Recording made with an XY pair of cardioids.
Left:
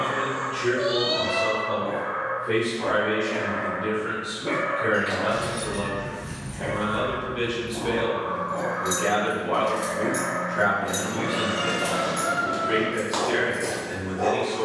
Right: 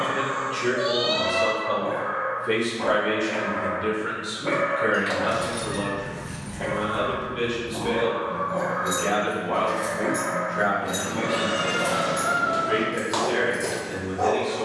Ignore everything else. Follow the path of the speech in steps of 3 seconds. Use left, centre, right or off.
right, right, centre, left, left.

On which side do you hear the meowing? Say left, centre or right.
right.